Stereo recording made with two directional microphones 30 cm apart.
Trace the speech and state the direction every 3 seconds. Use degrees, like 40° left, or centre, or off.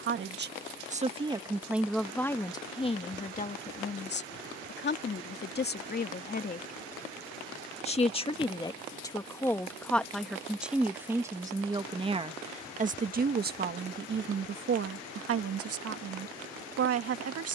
10° right, 30° left, 20° left, centre, 30° right, 50° right.